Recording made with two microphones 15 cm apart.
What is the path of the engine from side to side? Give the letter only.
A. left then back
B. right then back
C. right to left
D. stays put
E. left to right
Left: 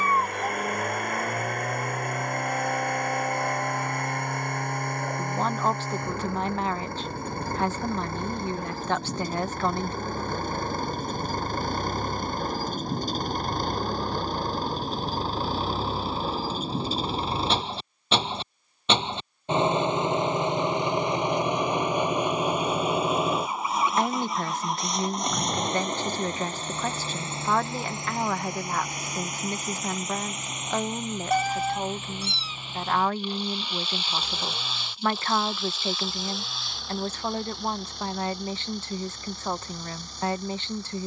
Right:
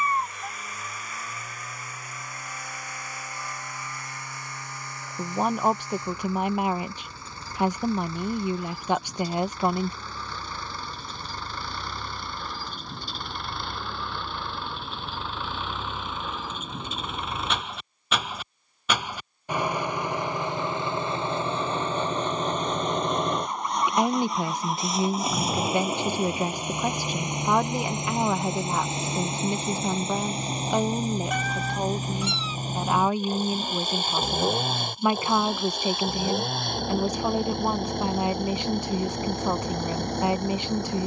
E.